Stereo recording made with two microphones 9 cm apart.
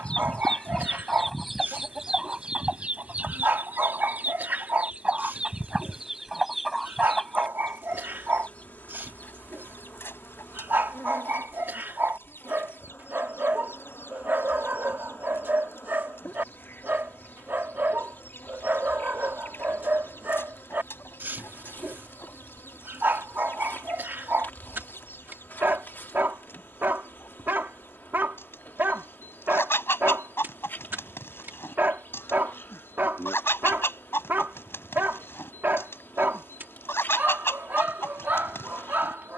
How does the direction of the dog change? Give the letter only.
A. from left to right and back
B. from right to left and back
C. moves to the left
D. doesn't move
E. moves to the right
D.